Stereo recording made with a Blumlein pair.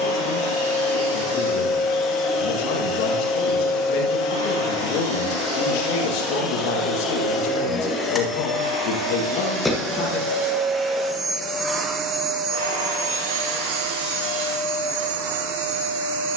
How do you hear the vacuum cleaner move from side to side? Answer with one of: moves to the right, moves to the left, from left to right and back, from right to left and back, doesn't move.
moves to the right.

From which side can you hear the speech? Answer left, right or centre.
left.